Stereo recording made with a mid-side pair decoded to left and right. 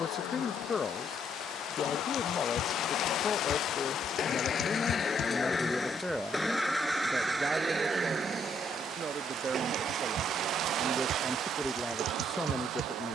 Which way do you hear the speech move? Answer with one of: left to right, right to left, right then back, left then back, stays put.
right then back.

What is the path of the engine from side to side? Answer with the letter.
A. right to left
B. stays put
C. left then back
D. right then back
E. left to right
E.